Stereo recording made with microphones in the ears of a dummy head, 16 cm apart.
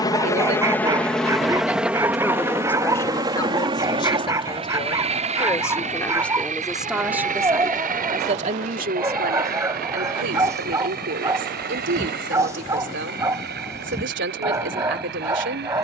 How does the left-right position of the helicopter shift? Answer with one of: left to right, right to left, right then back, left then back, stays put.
left to right.